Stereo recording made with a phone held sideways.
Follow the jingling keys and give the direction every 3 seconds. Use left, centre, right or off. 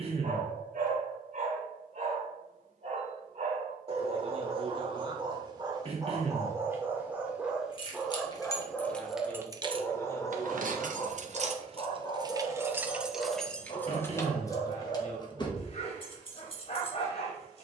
off, off, left, right, centre, left.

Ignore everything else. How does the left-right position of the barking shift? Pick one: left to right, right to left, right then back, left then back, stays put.
right to left.